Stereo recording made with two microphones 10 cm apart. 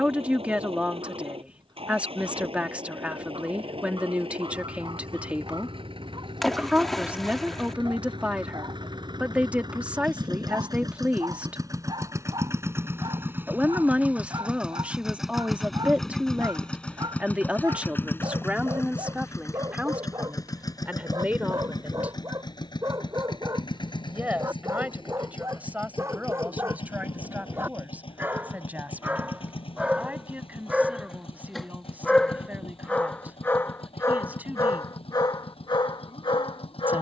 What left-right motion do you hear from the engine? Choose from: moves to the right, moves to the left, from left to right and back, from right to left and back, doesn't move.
moves to the left.